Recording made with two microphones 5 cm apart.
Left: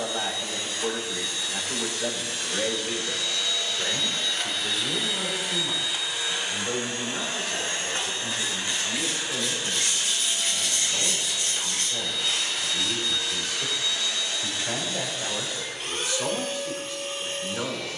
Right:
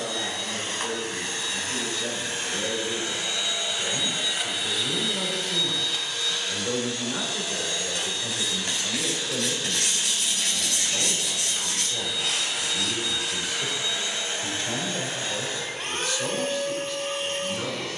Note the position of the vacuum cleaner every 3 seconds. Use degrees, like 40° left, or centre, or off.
40° right, 10° right, 30° left, 10° left, 20° right, 50° right.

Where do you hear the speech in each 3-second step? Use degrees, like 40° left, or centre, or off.
40° left, 10° left, 20° right, 10° right, centre, 20° left.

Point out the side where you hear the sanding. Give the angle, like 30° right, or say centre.
80° right.